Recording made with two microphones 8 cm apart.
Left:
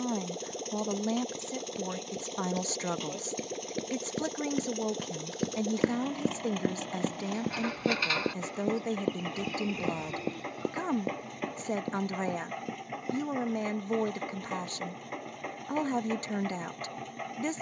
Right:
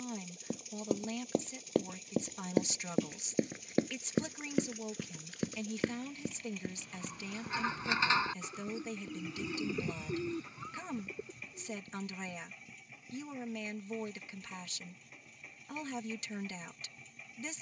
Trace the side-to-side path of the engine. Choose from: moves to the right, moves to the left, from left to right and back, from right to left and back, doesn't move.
doesn't move.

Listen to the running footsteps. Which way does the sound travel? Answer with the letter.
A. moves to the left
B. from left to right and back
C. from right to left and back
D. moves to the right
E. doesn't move
A.